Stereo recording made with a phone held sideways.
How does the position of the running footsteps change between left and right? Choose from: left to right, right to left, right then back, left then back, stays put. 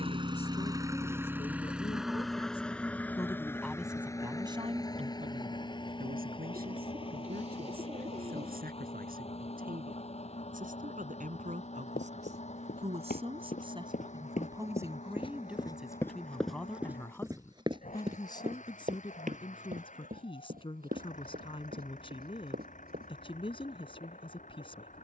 left to right.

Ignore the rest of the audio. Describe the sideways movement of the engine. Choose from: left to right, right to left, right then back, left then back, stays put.
right to left.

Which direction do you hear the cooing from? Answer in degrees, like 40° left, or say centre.
50° right.